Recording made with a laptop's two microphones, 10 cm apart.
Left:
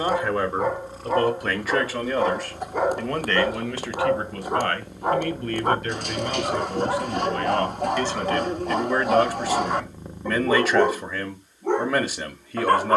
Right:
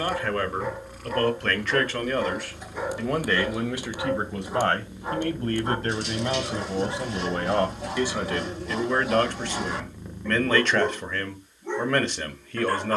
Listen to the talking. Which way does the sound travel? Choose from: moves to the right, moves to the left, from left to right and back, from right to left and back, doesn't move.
from left to right and back.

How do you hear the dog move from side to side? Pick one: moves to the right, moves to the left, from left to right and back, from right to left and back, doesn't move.
doesn't move.